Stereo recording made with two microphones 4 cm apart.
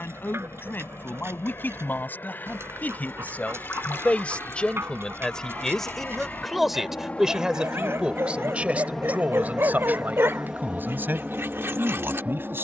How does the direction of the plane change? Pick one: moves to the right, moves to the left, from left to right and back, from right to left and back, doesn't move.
moves to the right.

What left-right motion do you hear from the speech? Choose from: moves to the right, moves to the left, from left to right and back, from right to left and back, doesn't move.
moves to the right.